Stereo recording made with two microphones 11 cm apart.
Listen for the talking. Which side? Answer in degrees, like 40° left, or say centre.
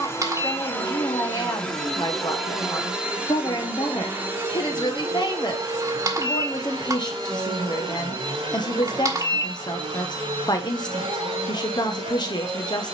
40° left.